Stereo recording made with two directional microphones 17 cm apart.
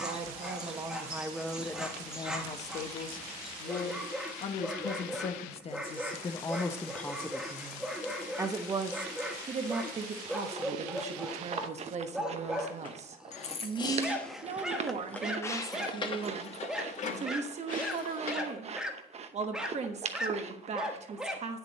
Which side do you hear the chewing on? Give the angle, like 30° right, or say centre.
40° right.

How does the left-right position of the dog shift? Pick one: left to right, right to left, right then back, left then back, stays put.
stays put.